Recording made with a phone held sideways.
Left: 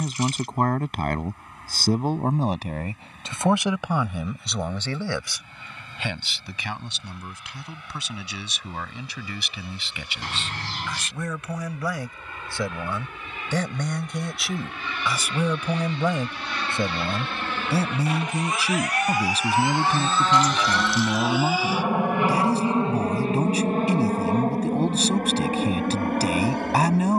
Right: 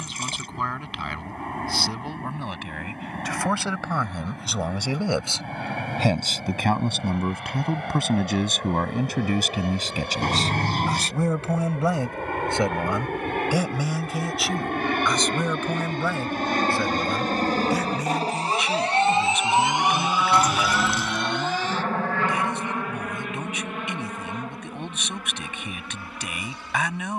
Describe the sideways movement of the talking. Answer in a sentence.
You can hear the talking move from left to right and back again.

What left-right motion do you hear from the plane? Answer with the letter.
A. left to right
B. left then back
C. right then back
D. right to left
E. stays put
D.